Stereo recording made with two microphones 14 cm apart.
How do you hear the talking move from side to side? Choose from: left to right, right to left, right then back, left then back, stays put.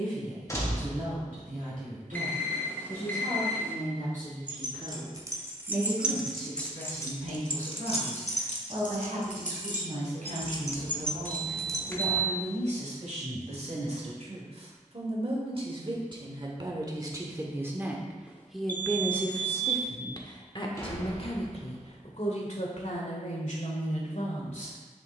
right to left.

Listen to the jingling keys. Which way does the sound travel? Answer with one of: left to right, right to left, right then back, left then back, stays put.
left then back.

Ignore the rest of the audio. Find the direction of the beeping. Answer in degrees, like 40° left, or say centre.
10° left.